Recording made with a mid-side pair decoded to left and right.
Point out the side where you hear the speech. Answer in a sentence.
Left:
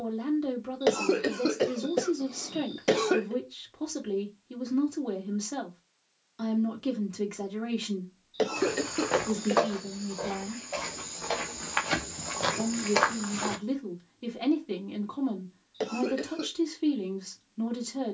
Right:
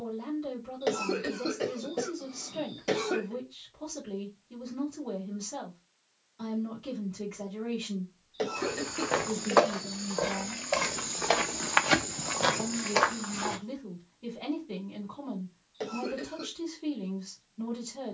In this clip you hear the speech on the left.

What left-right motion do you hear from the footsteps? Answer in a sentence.
In this clip you hear the footsteps go right and come back.